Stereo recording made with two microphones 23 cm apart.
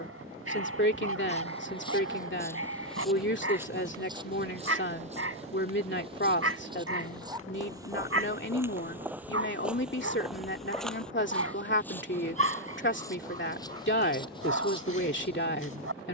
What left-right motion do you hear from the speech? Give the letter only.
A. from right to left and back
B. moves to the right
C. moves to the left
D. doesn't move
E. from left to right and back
D.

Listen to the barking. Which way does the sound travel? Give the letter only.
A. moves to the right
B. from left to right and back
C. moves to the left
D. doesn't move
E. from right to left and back
D.